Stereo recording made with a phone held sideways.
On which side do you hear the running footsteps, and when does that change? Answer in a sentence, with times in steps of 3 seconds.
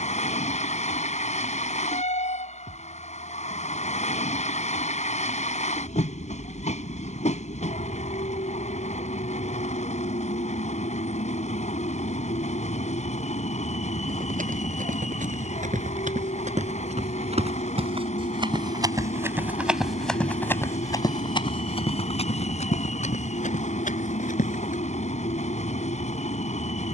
You can hear the running footsteps not at all from 0 s, on the right from 12 s, in the centre from 18 s and on the left from 21 s.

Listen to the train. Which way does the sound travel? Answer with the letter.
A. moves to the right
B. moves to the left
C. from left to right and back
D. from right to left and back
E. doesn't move
E.